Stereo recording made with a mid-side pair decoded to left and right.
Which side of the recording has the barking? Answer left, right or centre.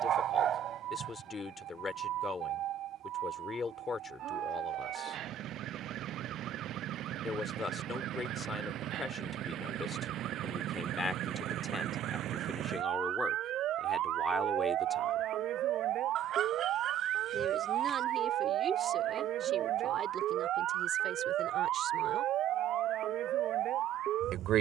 right.